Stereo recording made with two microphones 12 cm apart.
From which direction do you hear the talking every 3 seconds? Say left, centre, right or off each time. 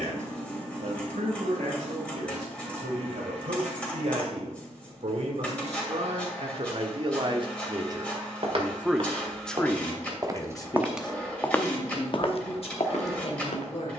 right, right, right, left, left.